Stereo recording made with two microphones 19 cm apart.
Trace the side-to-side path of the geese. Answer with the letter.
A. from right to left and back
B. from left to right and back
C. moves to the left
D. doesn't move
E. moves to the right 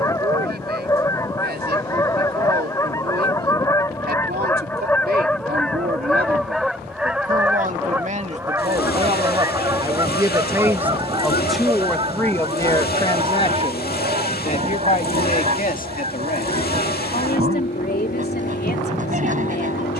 E.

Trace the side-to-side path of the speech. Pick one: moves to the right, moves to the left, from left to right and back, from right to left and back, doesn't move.
moves to the left.